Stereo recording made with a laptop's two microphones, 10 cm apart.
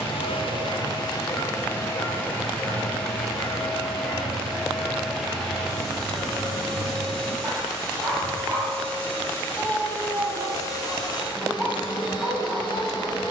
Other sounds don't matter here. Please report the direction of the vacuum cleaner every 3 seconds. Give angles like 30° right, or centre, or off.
30° left, centre, centre, 30° left, 50° left.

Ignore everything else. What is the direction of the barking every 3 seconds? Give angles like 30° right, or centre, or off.
40° left, centre, 10° right, 20° right, 20° right.